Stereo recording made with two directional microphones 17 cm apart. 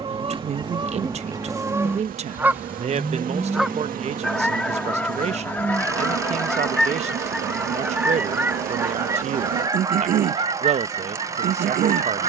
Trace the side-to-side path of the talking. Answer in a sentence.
In this clip you hear the talking stay put.